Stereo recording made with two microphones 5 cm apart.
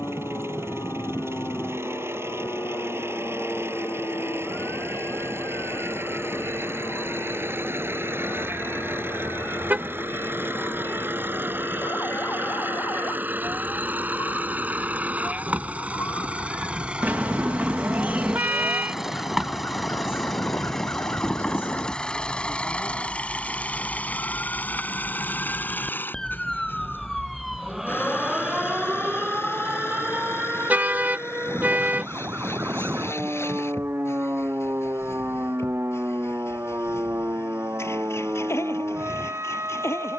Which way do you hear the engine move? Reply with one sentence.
You can hear the engine go from the right side to the left.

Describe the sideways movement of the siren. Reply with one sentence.
In this clip you hear the siren move from left to right.